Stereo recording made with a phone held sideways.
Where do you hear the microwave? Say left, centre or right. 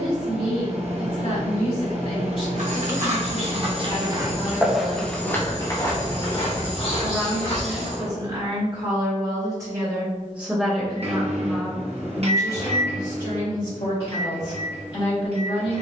right.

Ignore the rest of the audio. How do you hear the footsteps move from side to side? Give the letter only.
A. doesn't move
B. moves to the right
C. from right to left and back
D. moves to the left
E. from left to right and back
D.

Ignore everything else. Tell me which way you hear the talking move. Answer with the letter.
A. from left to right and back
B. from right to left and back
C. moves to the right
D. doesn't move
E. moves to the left
A.